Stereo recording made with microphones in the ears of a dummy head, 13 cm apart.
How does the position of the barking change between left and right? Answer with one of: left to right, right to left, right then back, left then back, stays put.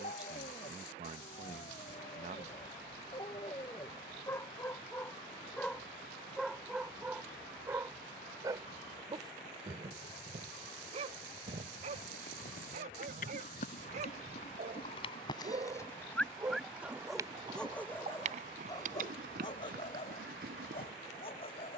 right then back.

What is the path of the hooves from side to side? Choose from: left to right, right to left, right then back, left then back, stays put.
left to right.